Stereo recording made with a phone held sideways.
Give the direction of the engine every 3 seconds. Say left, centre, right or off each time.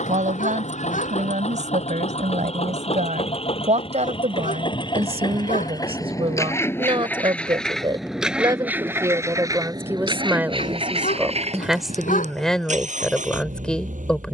left, left, centre, right, right.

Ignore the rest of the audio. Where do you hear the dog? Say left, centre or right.
left.